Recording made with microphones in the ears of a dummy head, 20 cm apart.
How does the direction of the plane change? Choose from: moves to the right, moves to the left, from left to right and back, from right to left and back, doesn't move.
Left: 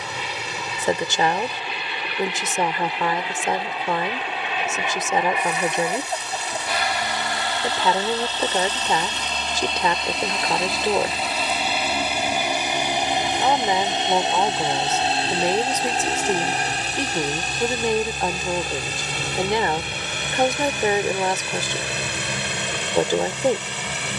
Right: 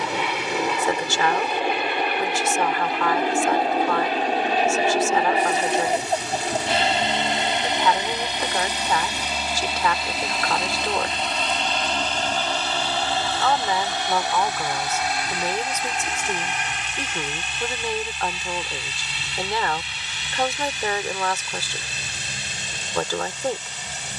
moves to the left.